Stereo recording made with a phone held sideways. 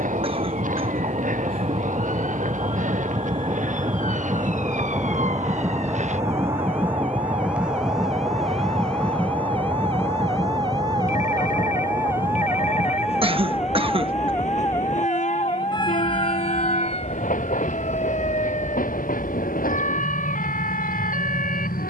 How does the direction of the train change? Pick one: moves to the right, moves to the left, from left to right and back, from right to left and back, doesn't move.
moves to the left.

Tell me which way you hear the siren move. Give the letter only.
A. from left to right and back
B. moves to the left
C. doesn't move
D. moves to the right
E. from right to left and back
B.